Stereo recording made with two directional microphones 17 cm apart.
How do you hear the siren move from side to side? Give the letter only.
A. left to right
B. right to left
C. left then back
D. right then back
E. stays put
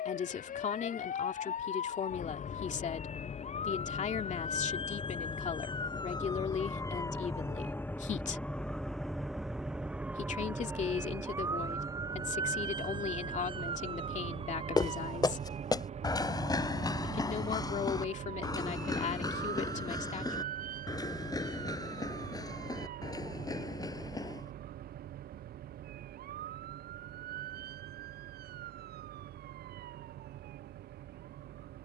A.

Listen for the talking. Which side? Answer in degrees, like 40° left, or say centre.
50° left.